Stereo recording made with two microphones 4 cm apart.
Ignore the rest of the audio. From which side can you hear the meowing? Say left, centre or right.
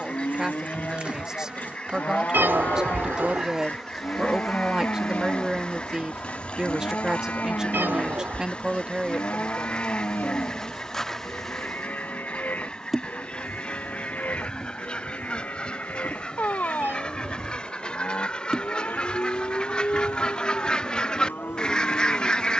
right.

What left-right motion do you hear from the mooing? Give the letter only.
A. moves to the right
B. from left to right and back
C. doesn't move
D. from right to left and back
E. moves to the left
C.